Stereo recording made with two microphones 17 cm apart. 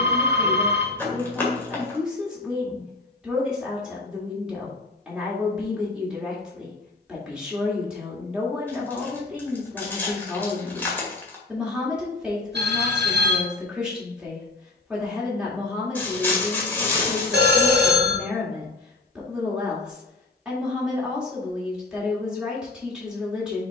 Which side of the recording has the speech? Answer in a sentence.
In this clip you hear the speech in the centre.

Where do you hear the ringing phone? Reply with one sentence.
In this clip you hear the ringing phone on the right.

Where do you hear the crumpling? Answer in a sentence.
In this clip you hear the crumpling in the centre.